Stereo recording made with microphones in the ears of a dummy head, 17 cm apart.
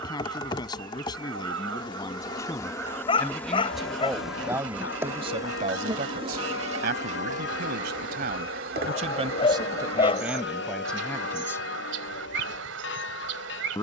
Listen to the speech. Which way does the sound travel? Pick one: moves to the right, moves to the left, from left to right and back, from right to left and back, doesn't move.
from left to right and back.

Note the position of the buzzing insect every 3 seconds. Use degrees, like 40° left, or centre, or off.
20° left, 10° right, 40° right, 60° right, 70° right.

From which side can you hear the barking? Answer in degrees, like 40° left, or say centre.
30° left.